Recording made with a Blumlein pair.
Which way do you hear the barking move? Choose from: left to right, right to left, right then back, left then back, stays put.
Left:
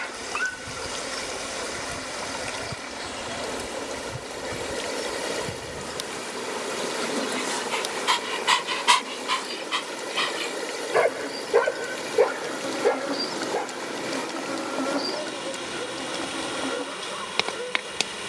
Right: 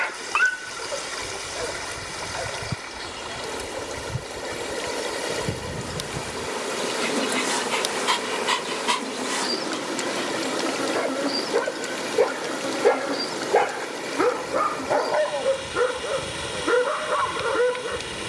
left then back.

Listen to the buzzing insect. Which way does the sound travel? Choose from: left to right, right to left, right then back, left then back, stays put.
right then back.